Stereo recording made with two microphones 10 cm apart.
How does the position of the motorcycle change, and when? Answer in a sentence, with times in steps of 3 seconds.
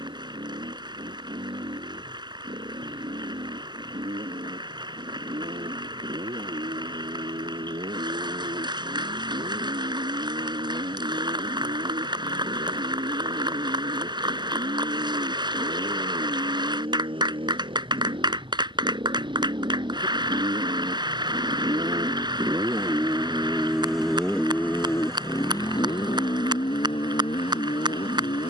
You can hear the motorcycle on the right from 0 s and on the left from 24 s.